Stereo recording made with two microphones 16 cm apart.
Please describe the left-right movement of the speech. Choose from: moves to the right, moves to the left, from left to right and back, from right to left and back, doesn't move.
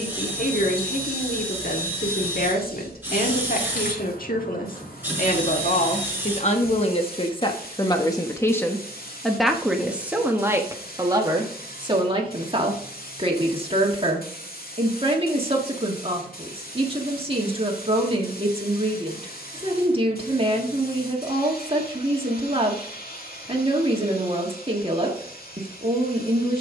moves to the right.